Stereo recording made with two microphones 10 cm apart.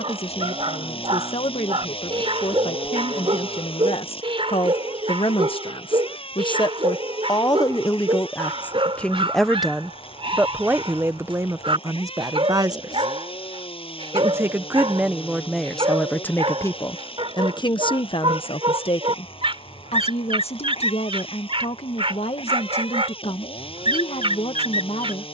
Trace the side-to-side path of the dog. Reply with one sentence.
In this clip you hear the dog stay in one place.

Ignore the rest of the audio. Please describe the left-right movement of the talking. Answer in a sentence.
You can hear the talking move from left to right and back again.